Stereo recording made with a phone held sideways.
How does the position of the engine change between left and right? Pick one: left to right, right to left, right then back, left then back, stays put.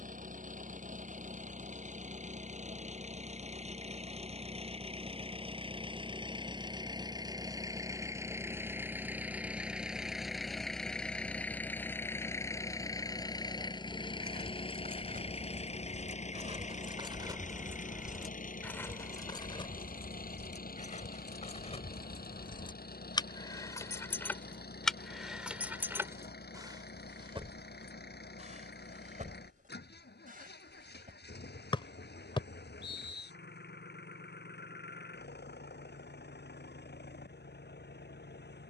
right to left.